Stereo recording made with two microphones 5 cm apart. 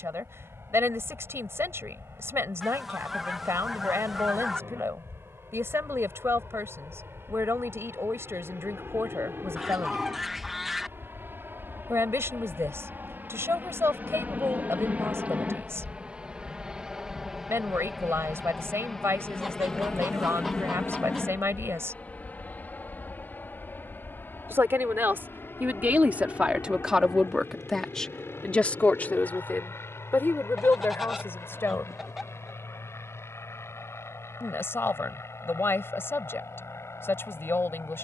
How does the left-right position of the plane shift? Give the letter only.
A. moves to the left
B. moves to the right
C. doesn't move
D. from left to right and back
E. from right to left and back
A.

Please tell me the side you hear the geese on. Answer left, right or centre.
centre.